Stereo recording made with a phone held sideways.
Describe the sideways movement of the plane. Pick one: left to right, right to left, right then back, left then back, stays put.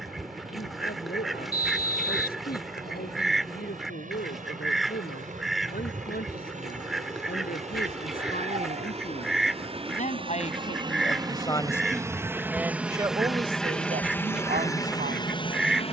right to left.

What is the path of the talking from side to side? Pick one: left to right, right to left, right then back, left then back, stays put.
left to right.